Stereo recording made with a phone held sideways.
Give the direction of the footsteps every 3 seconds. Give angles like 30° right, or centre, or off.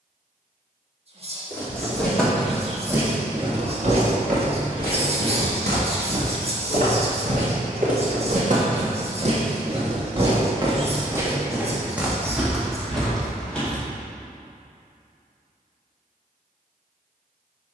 centre, 60° right, 60° right, 30° right, centre, off.